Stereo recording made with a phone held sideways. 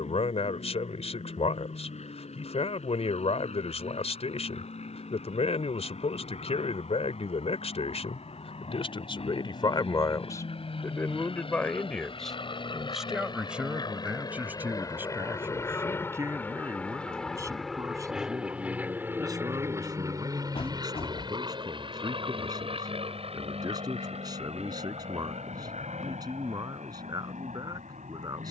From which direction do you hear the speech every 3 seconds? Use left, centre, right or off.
left, left, left, left, centre, right, right, right, right, right.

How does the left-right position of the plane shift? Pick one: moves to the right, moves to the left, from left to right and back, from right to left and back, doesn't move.
moves to the right.